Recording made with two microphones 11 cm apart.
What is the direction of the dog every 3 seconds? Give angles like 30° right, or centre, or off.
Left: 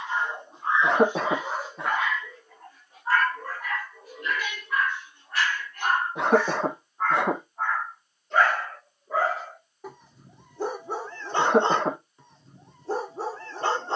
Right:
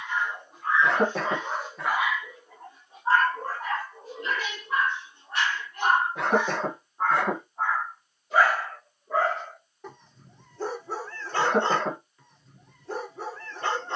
10° left, 30° right, 10° right, 10° left, 30° left.